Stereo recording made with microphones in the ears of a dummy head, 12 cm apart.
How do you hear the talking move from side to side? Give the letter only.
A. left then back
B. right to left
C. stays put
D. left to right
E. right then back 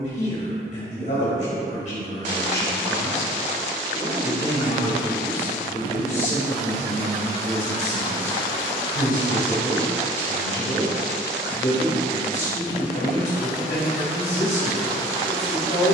C.